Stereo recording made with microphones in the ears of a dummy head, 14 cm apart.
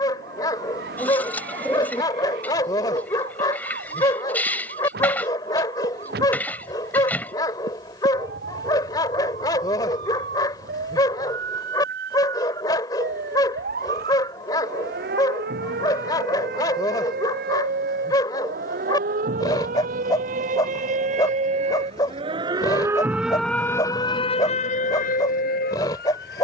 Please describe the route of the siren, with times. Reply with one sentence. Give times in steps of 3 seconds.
You can hear the siren on the right from 0 s and on the left from 24 s.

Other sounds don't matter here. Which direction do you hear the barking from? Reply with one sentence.
You can hear the barking on the left.